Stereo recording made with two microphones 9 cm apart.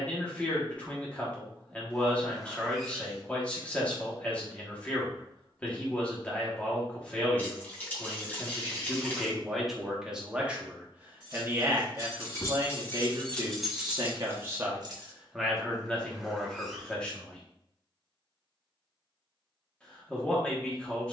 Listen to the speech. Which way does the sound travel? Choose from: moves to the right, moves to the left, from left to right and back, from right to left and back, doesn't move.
from left to right and back.